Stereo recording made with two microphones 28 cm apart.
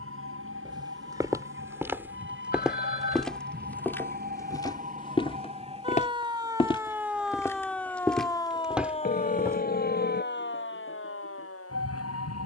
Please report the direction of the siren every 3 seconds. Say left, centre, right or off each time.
right, right, centre, left.